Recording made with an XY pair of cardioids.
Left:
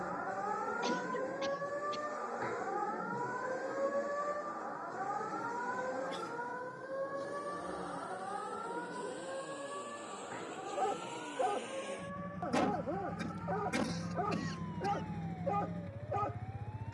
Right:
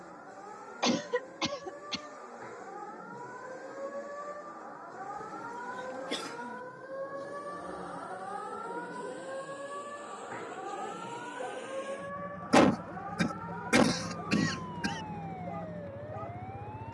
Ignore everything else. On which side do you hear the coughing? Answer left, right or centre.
right.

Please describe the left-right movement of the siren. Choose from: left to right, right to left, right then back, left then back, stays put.
left to right.